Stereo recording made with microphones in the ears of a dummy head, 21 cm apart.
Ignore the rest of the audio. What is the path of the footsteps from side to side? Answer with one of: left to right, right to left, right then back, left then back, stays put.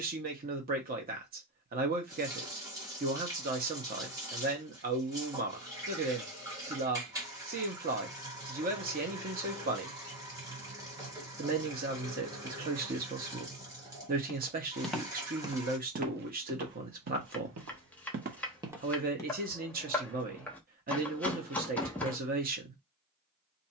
right then back.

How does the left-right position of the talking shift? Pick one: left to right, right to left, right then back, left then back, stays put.
stays put.